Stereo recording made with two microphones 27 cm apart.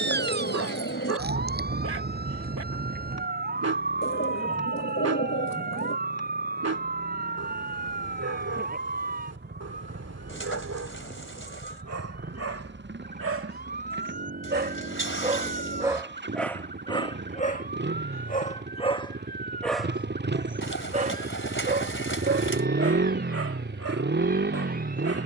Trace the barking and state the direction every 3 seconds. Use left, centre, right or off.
right, right, right, right, right, centre, centre, right, right.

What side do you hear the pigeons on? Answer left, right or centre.
left.